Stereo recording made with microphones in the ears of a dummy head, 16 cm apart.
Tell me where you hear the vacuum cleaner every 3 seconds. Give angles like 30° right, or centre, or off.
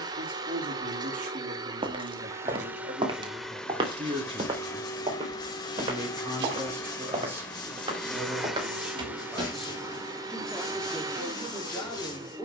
20° right, 10° left, 10° left, 20° right.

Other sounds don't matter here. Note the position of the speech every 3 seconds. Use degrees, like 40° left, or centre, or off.
50° right, 30° right, 10° right, 10° left.